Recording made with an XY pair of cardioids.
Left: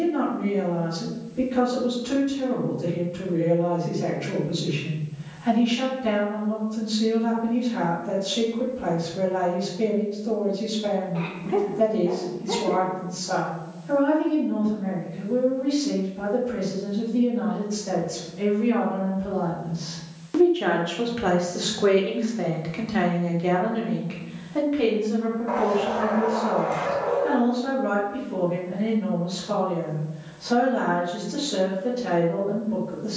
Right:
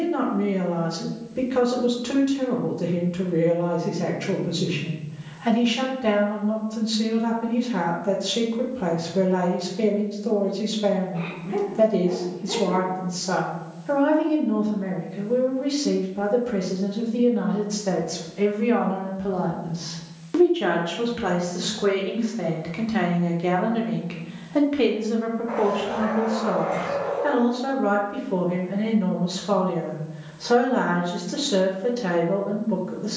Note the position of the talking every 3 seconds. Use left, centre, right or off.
right, right, right, right, right, right, right, centre, right, right, right.